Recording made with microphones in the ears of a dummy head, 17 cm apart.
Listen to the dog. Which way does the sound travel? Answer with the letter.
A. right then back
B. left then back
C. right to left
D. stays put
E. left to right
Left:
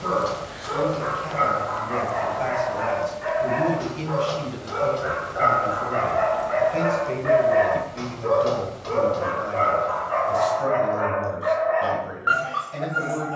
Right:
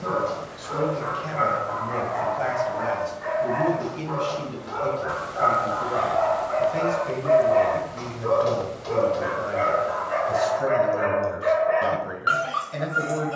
E.